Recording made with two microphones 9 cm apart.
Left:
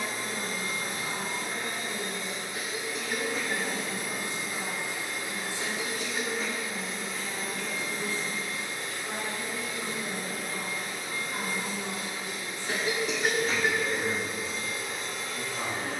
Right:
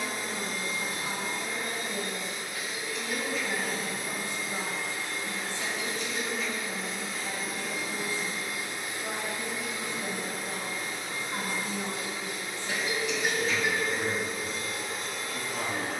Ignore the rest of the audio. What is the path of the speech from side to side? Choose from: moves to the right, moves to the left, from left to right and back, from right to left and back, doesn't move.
doesn't move.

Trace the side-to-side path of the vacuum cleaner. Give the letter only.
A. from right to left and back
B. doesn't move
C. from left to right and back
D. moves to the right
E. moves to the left
D.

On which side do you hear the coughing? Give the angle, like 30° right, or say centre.
40° left.